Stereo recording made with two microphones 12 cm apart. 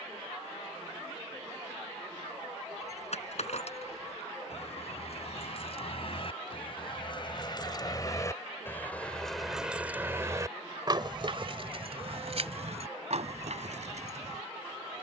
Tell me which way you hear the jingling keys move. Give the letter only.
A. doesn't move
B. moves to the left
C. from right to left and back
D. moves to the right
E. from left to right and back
D.